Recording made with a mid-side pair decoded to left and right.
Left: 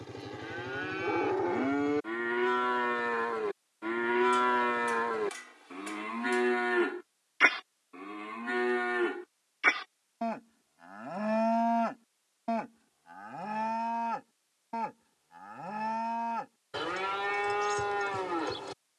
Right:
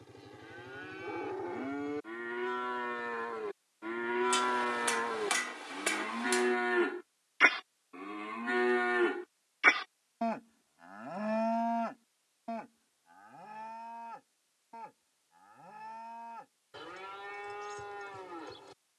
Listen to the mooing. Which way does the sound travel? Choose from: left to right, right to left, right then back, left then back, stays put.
right then back.